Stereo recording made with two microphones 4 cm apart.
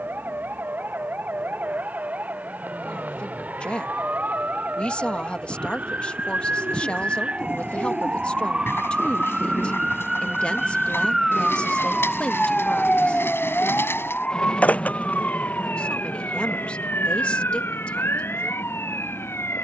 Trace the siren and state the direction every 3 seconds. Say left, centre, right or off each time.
right, right, right, centre, left, left, left.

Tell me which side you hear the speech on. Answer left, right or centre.
left.